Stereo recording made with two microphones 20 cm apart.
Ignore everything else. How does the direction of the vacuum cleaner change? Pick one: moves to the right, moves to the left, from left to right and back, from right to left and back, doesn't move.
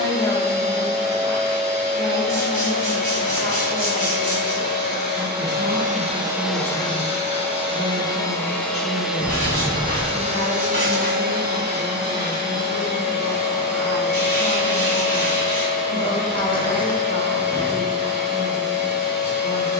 from right to left and back.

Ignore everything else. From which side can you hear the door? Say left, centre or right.
left.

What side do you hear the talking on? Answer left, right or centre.
left.